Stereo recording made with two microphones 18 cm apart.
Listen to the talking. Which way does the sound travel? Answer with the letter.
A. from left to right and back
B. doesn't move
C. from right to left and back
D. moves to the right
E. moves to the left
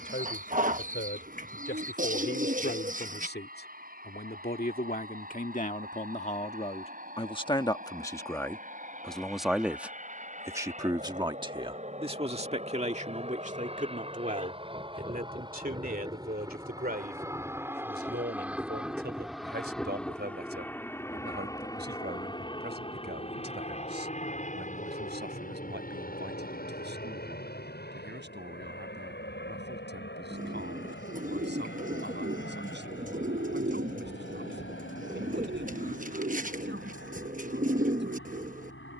D.